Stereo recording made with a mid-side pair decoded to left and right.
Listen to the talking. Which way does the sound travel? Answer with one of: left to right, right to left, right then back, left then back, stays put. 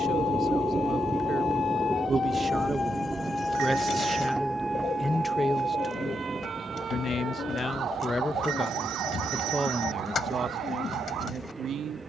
left then back.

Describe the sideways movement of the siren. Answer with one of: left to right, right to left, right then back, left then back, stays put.
left to right.